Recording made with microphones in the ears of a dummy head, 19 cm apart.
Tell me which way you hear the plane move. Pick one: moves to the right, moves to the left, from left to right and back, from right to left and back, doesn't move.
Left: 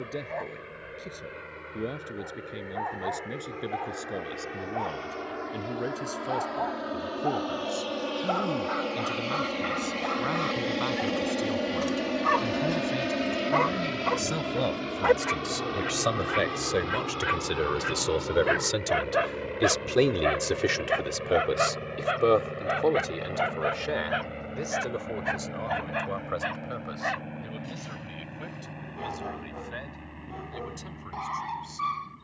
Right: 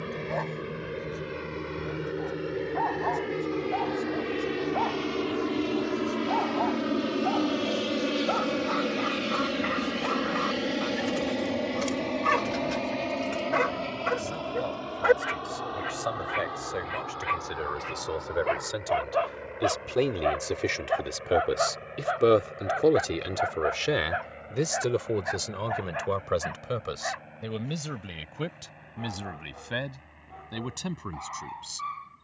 moves to the left.